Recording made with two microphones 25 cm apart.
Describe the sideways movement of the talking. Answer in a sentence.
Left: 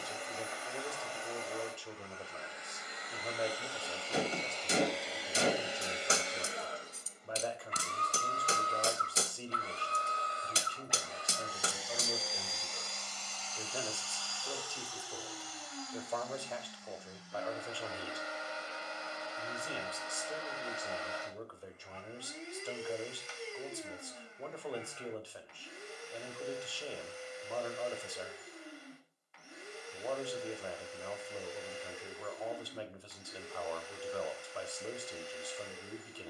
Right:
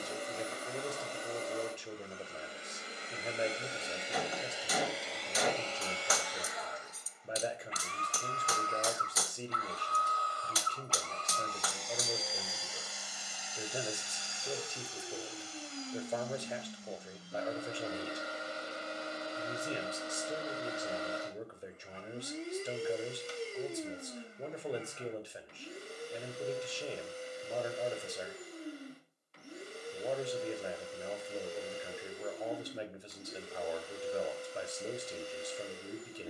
You can hear the talking stay in one place.